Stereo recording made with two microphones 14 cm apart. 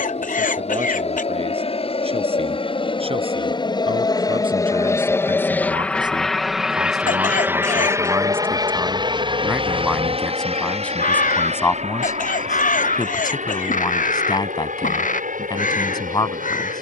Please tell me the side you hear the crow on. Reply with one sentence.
In this clip you hear the crow on the left.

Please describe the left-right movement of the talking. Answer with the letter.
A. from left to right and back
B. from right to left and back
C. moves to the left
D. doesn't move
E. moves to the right
C.